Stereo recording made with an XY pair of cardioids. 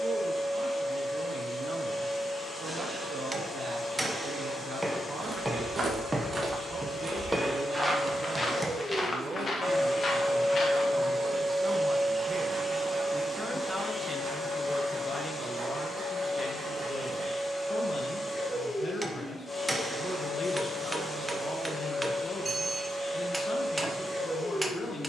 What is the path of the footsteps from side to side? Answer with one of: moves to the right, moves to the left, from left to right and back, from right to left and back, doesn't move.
moves to the left.